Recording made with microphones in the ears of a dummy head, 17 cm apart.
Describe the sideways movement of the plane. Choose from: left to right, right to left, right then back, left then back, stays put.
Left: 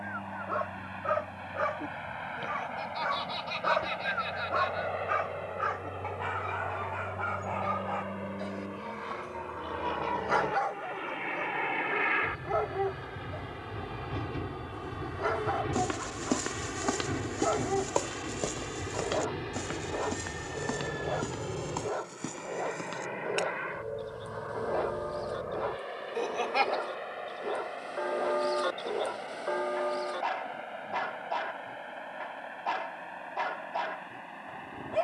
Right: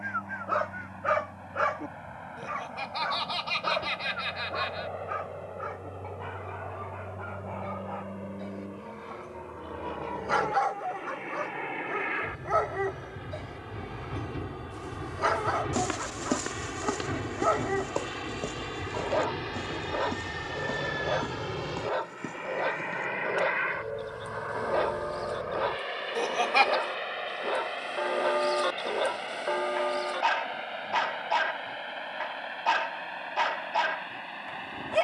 left to right.